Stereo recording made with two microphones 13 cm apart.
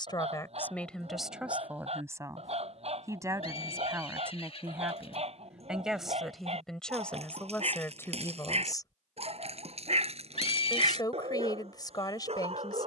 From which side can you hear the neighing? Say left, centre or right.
left.